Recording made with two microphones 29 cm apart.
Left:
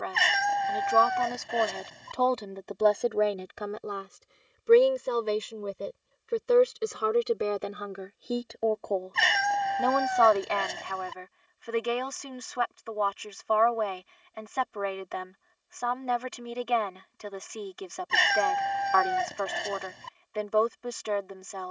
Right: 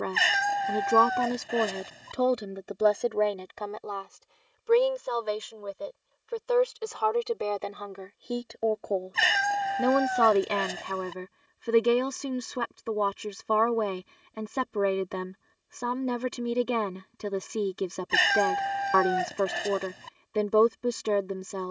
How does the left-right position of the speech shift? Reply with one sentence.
You can hear the speech move from right to left and back again.